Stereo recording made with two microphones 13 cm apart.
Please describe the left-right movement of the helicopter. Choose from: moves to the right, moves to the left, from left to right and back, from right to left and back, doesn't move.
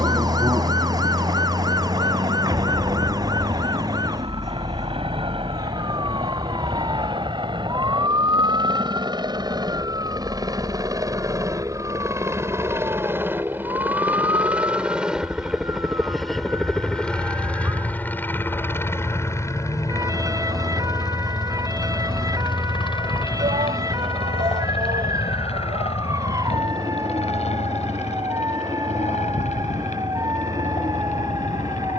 moves to the left.